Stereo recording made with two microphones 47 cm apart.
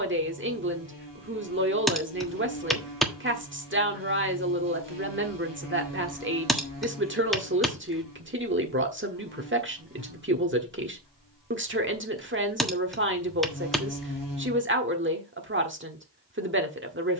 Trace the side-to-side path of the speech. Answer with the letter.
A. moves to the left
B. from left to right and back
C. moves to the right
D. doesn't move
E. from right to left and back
D.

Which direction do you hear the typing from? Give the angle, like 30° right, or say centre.
centre.